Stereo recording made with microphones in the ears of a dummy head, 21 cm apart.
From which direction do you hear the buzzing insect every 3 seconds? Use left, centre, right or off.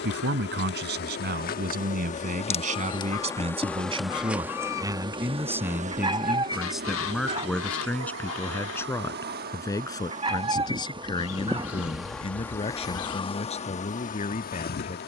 left, centre, right, right, left.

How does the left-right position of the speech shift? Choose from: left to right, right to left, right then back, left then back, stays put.
right to left.